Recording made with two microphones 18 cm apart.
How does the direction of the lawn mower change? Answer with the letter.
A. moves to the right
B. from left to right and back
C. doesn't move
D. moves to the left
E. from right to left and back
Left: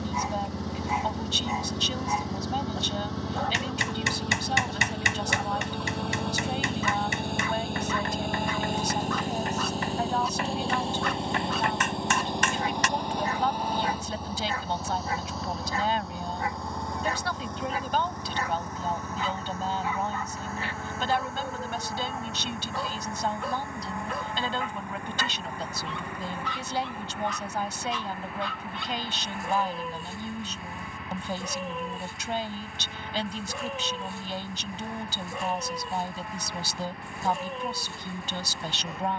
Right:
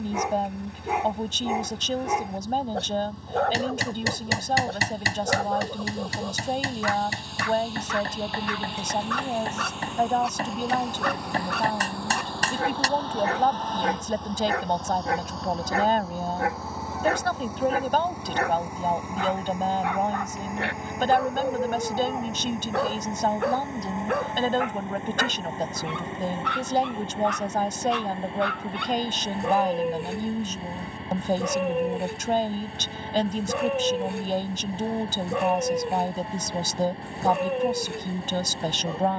A.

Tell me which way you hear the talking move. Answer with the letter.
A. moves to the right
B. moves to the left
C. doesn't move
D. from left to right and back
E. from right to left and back
C.